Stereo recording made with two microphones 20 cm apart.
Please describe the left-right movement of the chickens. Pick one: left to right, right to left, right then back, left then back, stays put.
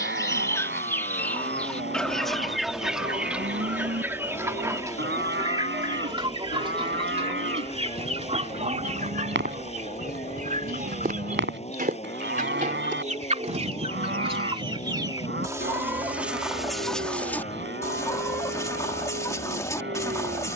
right then back.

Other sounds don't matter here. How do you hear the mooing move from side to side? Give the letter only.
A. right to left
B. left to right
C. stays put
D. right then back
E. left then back
C.